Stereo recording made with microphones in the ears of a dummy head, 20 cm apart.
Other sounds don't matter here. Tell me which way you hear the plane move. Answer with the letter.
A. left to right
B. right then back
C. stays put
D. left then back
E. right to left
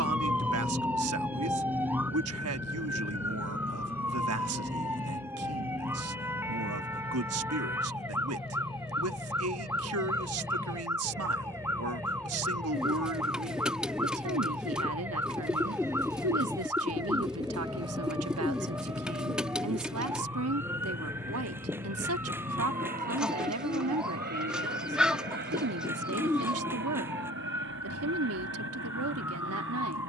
A.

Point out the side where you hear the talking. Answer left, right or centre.
right.